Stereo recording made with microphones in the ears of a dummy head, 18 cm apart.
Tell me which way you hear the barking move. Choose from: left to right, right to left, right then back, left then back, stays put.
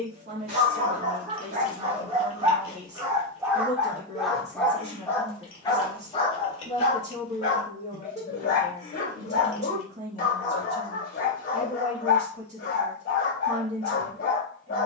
right to left.